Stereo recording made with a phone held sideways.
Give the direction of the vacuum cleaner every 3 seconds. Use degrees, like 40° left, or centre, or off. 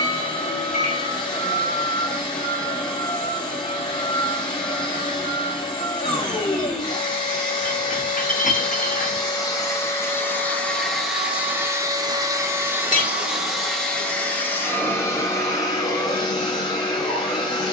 30° left, 30° left, 30° left, 10° left, centre, 20° left.